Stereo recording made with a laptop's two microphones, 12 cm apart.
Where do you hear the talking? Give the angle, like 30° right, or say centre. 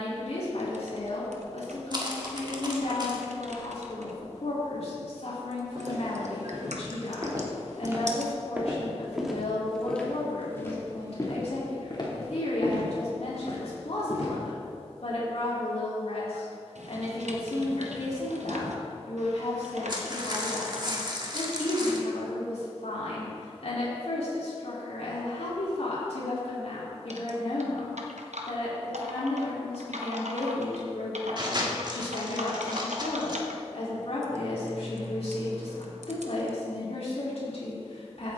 60° left.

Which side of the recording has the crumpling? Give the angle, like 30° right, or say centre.
40° right.